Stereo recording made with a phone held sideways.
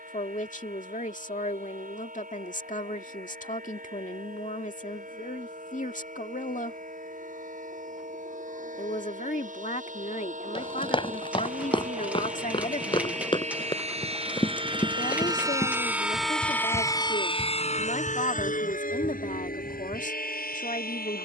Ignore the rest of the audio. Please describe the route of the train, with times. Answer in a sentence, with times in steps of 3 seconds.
In this clip you hear the train on the right from 0 s, in the centre from 15 s and on the left from 18 s.